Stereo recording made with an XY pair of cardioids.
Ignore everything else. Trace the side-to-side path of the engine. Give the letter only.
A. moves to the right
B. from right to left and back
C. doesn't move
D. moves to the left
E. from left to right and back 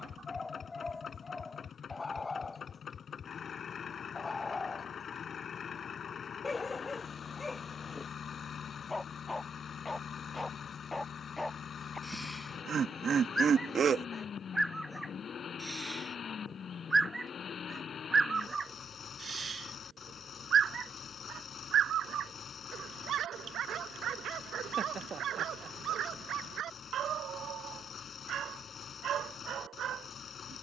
C.